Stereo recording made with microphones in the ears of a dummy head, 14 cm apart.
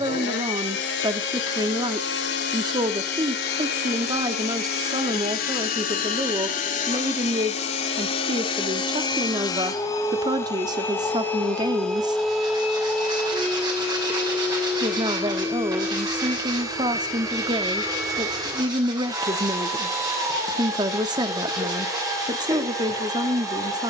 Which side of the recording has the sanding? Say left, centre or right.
right.